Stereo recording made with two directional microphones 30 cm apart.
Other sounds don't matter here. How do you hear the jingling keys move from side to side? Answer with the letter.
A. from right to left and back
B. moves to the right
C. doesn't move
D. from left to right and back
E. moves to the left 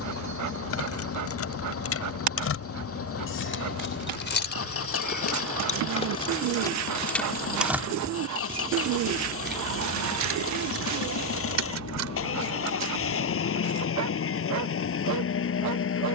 B.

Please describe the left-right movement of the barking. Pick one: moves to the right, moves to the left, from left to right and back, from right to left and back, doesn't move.
doesn't move.